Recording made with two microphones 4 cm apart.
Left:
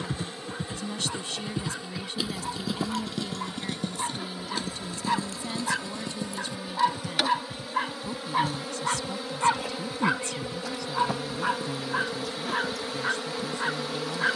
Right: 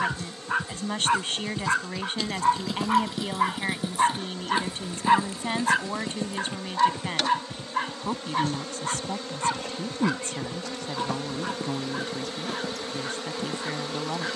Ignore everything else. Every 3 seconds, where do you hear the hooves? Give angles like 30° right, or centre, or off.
20° left, 20° right, 40° right, 50° right, 50° right.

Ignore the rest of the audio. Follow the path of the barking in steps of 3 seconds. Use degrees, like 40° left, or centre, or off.
70° right, 40° right, centre, 20° left, 30° left.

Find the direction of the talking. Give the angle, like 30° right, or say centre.
50° right.